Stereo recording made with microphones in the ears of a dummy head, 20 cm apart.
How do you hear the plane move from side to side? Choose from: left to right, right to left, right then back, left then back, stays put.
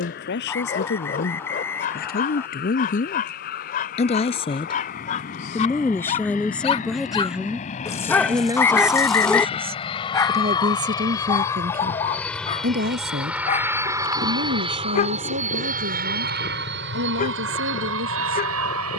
left to right.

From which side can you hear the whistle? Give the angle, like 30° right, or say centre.
10° left.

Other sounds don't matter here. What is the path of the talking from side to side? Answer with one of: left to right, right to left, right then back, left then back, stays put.
left to right.